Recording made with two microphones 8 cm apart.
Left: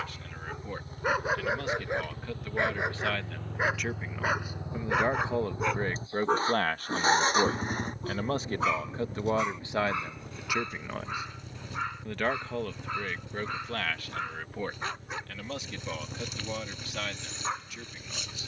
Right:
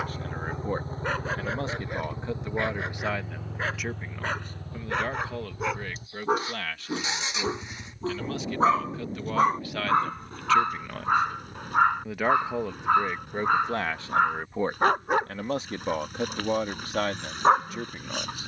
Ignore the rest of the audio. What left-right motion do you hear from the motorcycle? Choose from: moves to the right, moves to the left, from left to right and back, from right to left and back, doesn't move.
moves to the left.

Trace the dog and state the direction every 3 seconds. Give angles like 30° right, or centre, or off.
10° left, 10° left, 30° right, 60° right, 70° right, 70° right.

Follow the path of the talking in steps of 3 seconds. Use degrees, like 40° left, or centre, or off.
30° right, 10° left, 40° left, 20° left, 20° right, 50° right.